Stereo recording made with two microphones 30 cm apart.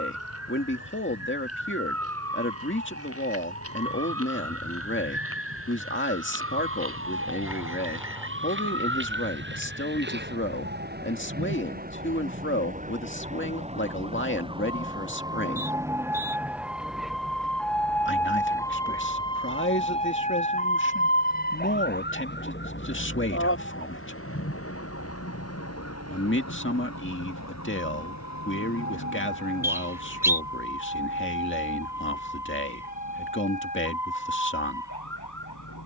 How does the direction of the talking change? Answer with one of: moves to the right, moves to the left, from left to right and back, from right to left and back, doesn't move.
doesn't move.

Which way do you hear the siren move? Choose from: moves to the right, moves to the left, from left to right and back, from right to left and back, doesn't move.
moves to the left.